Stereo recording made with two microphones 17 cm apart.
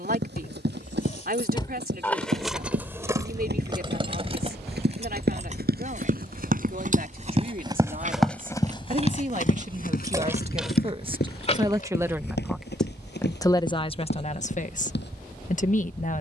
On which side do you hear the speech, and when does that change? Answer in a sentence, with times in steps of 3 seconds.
In this clip you hear the speech on the right from 0 s and on the left from 12 s.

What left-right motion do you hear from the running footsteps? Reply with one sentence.
You can hear the running footsteps move from right to left.